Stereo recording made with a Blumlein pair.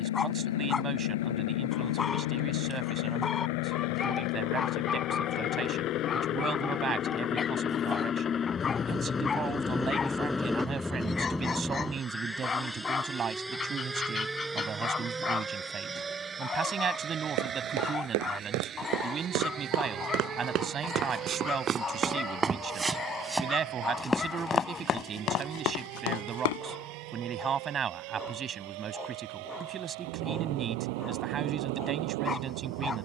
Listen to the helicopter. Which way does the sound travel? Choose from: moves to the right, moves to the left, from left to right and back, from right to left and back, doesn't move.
moves to the right.